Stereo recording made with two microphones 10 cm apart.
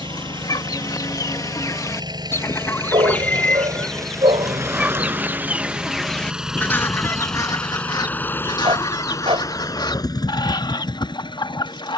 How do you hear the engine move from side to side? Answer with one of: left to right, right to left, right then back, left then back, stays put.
right to left.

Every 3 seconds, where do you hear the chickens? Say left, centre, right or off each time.
left, centre, left, left.